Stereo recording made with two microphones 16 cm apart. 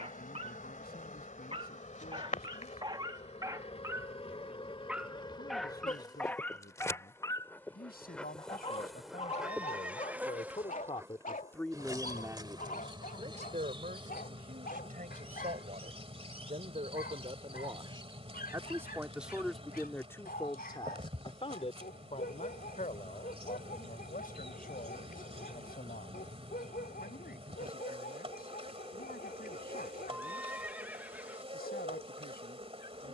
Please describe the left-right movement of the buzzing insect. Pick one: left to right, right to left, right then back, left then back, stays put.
left to right.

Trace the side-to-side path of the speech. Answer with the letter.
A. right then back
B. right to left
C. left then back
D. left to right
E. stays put
A.